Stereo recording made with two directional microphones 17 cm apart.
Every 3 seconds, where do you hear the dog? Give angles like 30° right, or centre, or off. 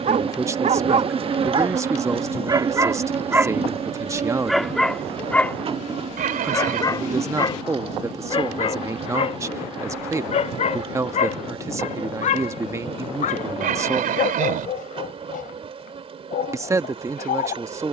30° right, centre, 30° left, 40° left, 50° left, 60° left.